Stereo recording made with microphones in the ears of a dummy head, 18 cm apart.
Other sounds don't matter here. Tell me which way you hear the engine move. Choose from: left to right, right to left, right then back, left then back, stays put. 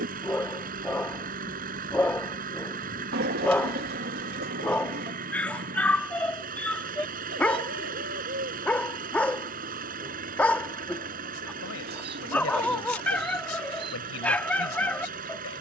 stays put.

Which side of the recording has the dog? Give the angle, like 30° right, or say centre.
10° left.